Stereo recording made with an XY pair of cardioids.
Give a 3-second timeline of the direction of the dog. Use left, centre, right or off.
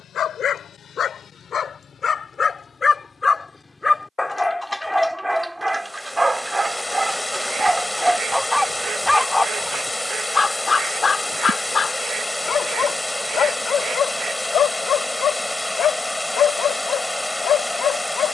left, centre, centre, left, left, left.